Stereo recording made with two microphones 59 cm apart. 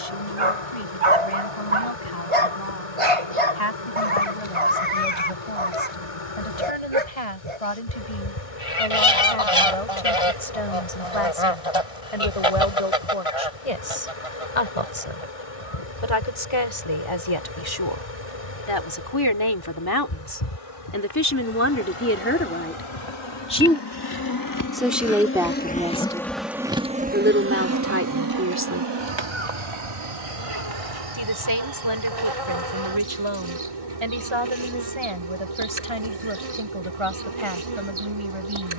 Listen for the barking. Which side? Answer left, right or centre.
right.